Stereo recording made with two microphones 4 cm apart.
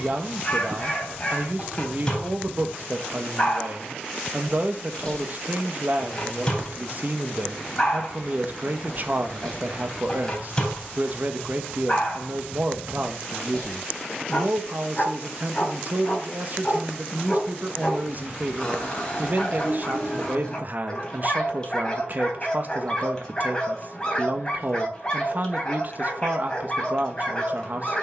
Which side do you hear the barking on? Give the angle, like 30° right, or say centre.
20° left.